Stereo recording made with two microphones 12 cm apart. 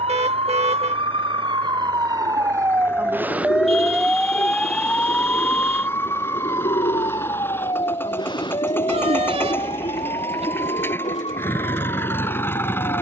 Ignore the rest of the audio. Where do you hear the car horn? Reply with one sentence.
You can hear the car horn on the right.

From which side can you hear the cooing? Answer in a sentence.
In this clip you hear the cooing on the left.